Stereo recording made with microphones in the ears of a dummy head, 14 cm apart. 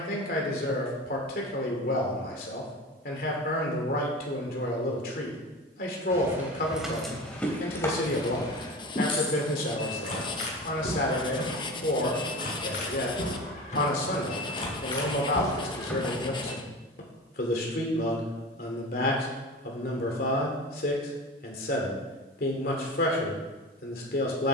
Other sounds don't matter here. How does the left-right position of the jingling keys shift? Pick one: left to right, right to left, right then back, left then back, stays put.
left then back.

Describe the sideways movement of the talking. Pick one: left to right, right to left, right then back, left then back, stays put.
stays put.